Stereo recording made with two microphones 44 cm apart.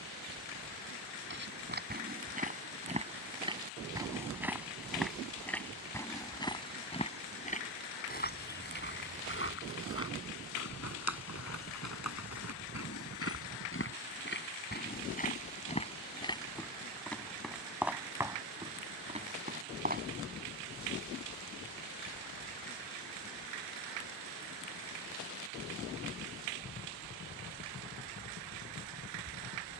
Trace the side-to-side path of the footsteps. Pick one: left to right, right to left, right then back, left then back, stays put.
left then back.